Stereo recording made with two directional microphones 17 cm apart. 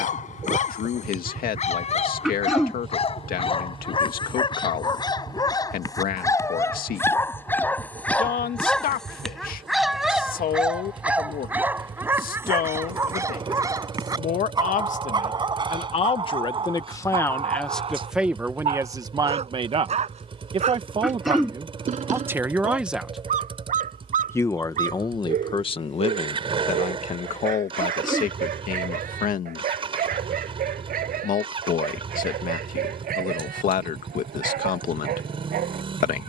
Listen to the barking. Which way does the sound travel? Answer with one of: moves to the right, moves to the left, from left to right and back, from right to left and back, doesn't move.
moves to the right.